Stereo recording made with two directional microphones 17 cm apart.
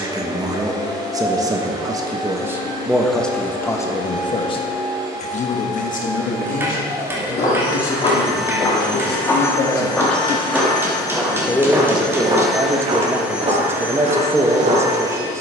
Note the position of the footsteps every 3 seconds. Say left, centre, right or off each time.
off, off, left, centre, right.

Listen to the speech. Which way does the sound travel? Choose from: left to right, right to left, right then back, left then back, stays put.
left then back.